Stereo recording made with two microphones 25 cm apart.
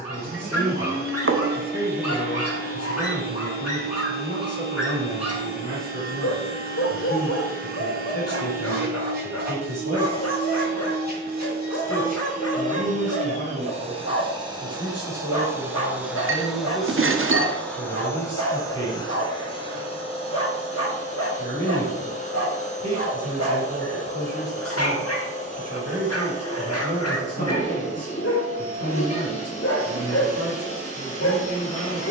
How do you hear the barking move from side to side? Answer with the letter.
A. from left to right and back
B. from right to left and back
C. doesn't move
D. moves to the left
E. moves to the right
C.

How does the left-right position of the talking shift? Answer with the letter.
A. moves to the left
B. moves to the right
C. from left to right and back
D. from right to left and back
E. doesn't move
E.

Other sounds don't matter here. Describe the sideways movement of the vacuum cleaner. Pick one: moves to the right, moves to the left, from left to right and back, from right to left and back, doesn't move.
moves to the left.